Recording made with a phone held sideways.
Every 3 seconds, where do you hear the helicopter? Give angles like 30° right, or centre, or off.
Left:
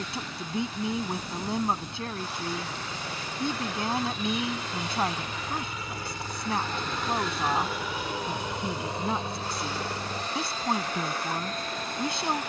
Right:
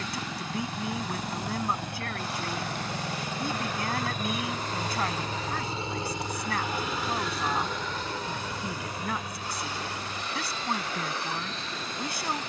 70° right, 50° right, centre, 40° left.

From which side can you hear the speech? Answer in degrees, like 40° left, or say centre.
20° left.